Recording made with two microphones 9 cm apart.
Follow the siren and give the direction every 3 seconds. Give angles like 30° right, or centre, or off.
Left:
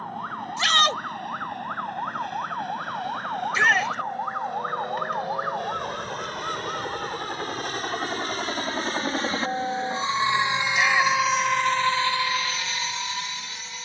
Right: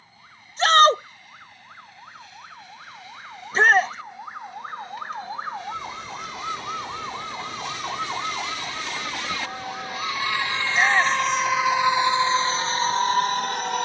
60° left, 30° left, 20° right, 50° right, 70° right.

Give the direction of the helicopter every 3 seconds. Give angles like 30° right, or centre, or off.
60° left, 60° left, 50° left, 20° left, 40° right.